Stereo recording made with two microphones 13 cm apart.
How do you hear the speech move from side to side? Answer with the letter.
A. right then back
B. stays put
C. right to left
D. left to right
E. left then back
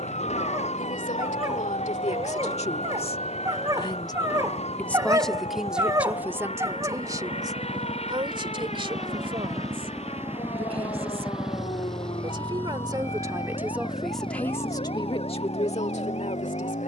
A.